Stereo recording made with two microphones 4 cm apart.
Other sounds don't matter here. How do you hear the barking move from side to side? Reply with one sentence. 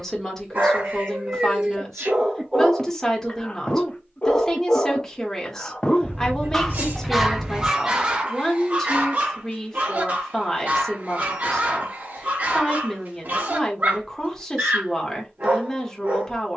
You can hear the barking go left and come back.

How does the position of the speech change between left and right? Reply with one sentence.
In this clip you hear the speech stay in one place.